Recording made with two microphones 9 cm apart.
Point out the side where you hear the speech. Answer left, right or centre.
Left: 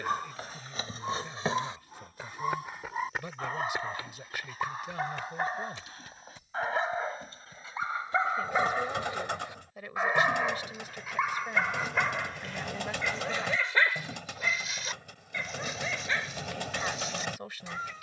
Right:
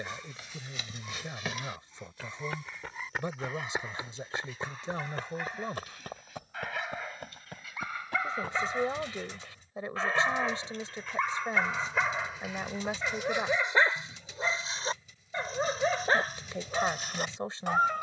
right.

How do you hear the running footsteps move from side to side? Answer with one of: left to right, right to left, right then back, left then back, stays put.
left to right.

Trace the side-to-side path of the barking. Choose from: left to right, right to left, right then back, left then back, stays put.
left to right.